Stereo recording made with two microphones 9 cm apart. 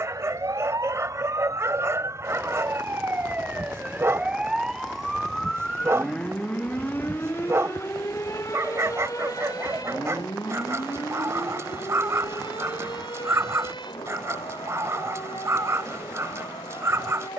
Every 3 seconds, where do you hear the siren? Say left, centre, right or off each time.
right, centre, left, left, left, left.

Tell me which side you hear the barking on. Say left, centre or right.
right.